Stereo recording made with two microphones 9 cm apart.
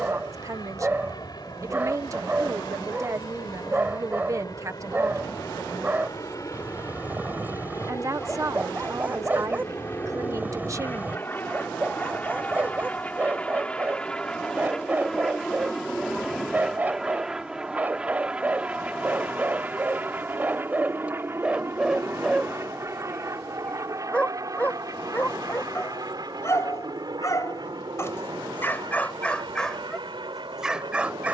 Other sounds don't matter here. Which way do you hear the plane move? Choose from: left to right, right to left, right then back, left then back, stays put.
left to right.